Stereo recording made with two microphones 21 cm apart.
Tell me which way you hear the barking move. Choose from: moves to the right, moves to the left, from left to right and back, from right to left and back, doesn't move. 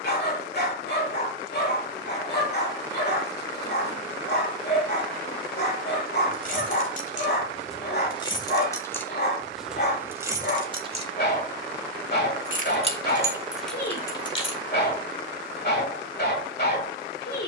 doesn't move.